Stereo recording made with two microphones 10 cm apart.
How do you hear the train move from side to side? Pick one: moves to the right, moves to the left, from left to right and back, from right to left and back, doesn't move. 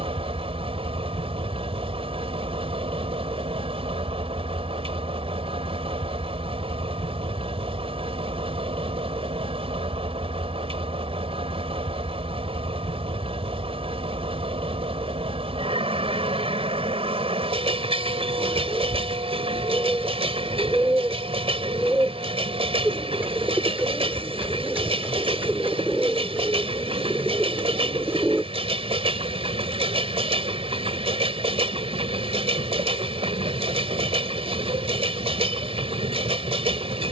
doesn't move.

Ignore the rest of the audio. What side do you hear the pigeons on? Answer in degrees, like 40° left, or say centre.
20° right.